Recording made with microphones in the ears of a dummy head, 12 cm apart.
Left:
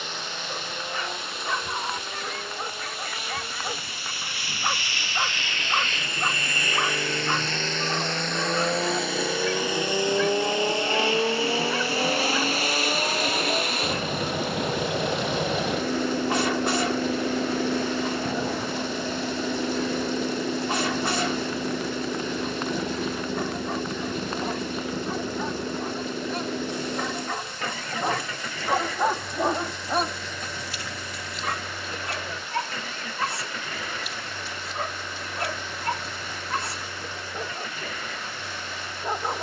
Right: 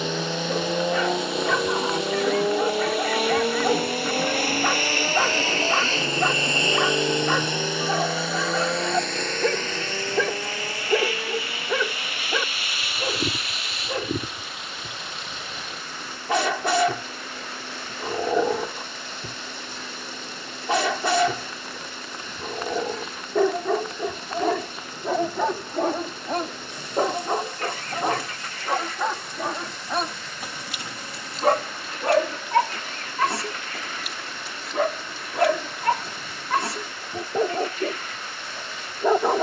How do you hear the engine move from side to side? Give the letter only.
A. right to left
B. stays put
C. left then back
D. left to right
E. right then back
A.